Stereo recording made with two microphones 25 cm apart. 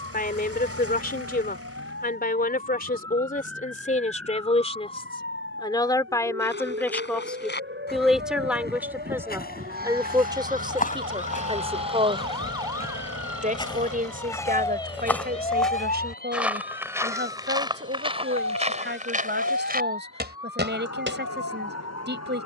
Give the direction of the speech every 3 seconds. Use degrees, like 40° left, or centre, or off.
40° left, 30° left, centre, 20° right, 30° right, 40° right, 40° right, 40° right.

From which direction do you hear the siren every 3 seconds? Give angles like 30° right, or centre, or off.
60° right, 60° right, 50° right, 30° right, centre, 40° left, 70° left, 80° left.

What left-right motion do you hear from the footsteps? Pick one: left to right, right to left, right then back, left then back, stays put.
left to right.